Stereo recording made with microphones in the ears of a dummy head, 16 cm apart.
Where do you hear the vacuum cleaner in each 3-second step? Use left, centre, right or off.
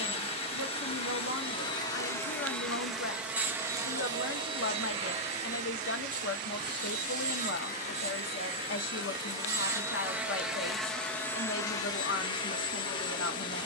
left, right, right, centre, left.